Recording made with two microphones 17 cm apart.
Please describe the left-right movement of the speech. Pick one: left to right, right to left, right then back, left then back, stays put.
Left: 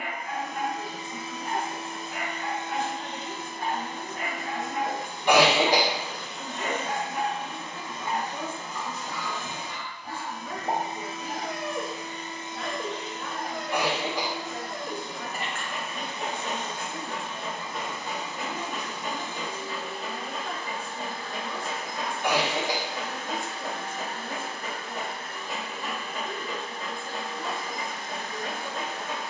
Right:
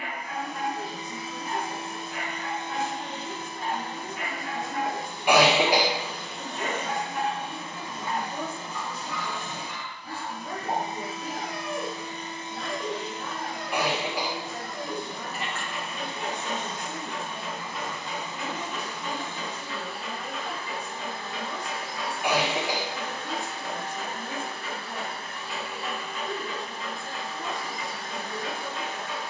stays put.